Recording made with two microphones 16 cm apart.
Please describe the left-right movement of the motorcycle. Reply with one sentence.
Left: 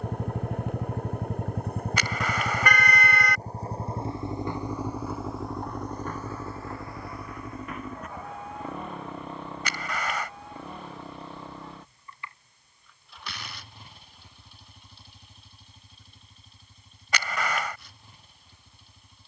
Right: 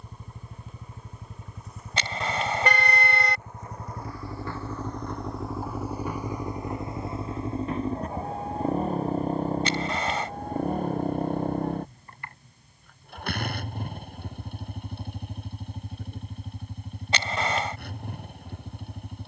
You can hear the motorcycle go from the left side to the right.